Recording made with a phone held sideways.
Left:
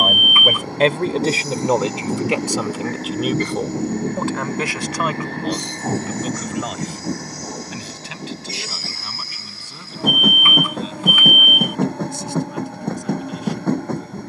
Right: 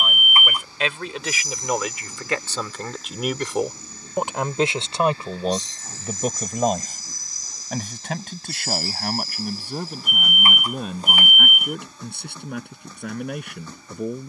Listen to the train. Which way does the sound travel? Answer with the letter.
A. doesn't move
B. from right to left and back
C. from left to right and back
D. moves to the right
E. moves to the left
A.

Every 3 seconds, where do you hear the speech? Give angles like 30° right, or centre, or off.
30° left, 20° right, 50° right, 60° right, 60° right.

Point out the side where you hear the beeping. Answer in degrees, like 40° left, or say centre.
40° right.